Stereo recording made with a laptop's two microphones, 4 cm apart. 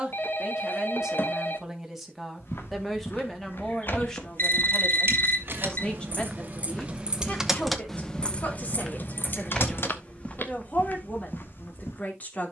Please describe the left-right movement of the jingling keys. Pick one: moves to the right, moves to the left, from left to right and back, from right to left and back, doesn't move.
moves to the left.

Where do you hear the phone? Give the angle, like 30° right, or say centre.
50° left.